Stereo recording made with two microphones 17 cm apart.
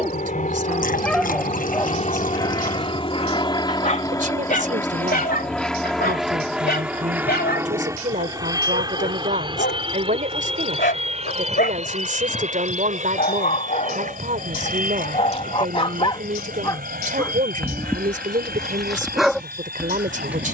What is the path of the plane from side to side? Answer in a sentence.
You can hear the plane move from left to right.